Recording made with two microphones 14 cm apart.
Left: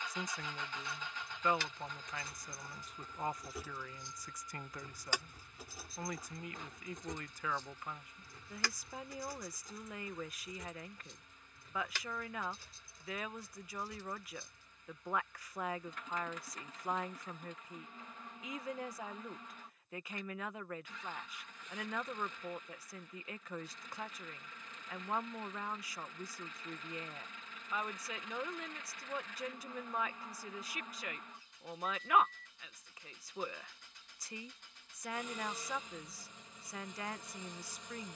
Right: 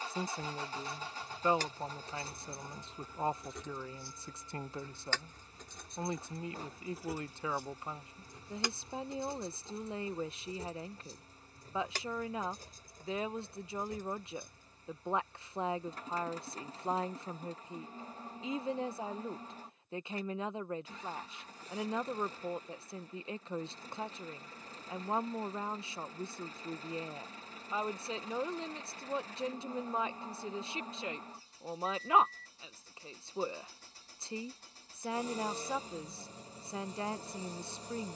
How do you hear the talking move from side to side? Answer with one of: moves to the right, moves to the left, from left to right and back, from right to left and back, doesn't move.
doesn't move.